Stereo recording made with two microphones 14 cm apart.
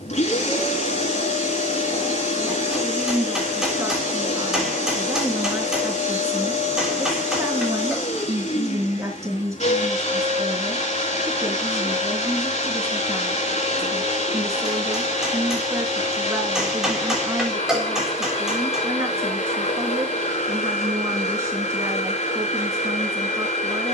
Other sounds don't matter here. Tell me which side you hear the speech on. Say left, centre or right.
right.